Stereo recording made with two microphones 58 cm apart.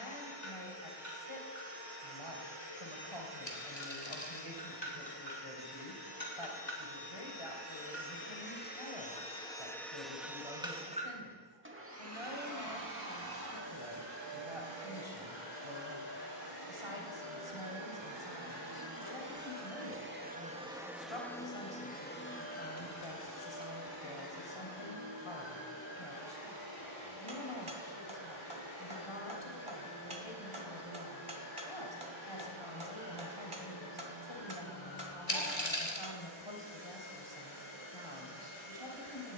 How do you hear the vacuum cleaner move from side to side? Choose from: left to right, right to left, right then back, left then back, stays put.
right then back.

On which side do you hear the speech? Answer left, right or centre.
left.